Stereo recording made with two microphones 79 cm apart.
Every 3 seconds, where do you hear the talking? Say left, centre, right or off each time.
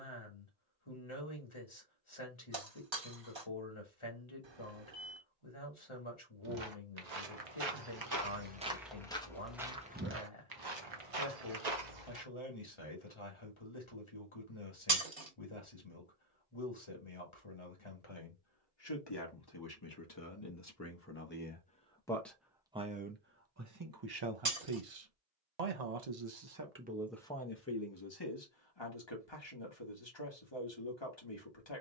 left, left, left, left, left, left, left, centre, right, left, left.